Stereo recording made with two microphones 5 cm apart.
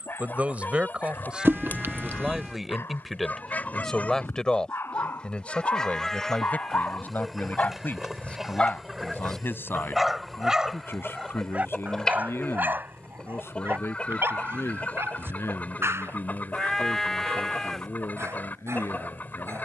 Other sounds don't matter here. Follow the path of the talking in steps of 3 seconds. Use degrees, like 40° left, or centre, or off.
20° right, 20° left, 40° left, 60° left, 60° left, 70° left, 70° left.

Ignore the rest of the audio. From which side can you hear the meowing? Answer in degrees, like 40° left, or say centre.
50° right.